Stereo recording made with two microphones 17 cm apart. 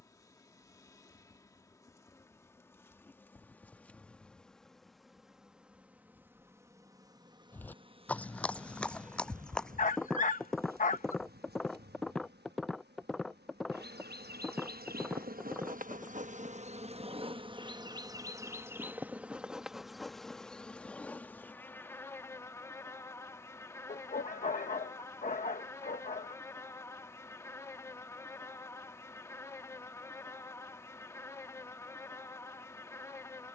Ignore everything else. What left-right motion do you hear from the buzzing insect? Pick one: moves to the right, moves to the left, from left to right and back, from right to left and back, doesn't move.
from left to right and back.